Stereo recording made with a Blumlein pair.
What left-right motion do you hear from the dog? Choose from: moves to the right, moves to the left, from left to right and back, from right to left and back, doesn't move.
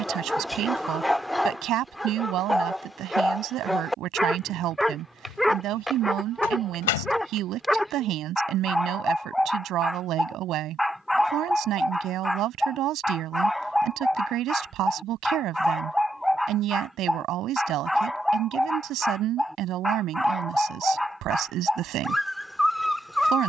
doesn't move.